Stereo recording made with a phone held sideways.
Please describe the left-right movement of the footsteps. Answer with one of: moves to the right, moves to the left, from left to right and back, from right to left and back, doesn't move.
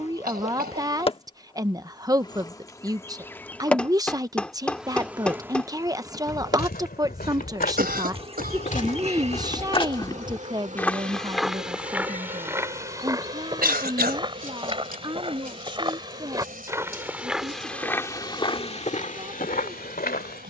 from left to right and back.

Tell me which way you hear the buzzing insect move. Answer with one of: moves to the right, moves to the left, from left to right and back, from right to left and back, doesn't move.
moves to the right.